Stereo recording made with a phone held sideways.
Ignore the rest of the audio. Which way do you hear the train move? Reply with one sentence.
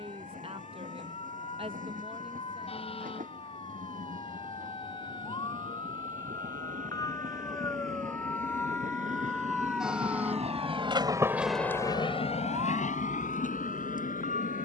You can hear the train go from the right side to the left.